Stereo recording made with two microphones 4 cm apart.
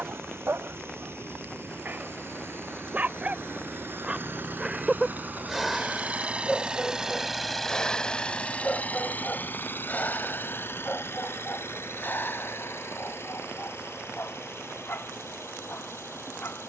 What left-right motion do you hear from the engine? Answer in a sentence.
In this clip you hear the engine go from the right side to the left.